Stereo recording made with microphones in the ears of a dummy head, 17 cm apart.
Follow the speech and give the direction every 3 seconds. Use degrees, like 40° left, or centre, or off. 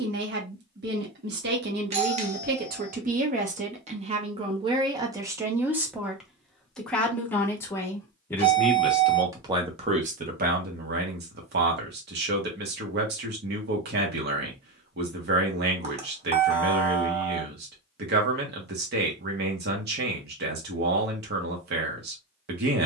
60° right, 30° right, 10° left, 40° right, 60° right, 60° right, 60° right, 60° right.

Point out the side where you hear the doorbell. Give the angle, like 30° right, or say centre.
40° right.